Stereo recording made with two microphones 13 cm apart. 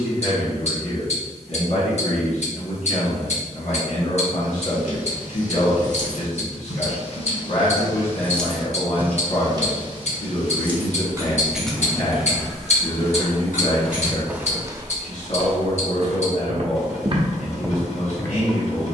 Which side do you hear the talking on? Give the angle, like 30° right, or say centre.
60° left.